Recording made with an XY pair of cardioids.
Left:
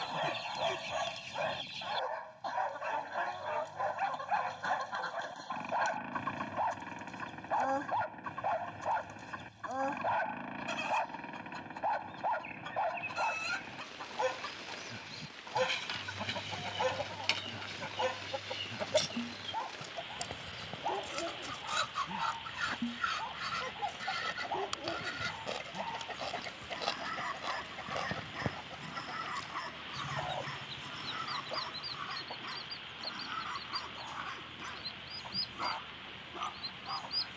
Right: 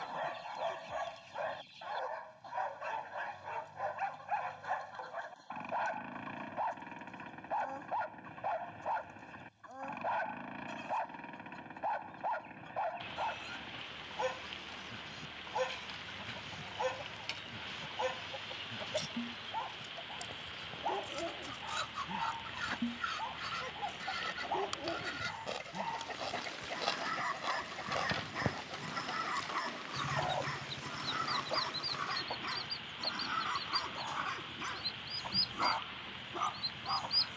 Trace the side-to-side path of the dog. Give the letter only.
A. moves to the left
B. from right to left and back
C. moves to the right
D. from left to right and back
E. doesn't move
C.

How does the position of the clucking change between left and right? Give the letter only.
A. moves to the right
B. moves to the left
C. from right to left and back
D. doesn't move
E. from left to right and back
A.